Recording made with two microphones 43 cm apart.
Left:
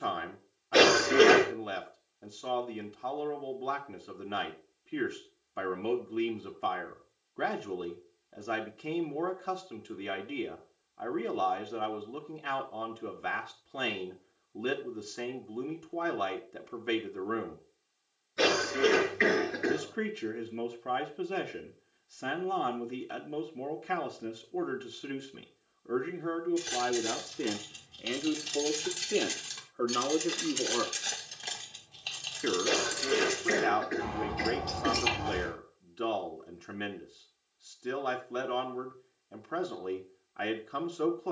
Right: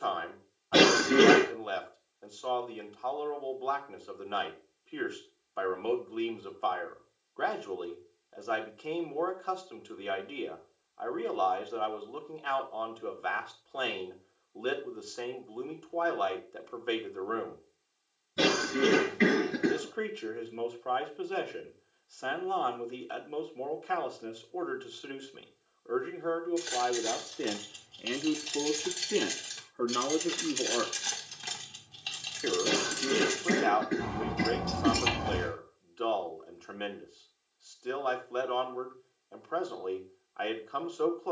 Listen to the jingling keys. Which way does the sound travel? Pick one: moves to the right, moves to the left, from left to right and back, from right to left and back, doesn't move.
moves to the right.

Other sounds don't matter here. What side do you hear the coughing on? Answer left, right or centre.
right.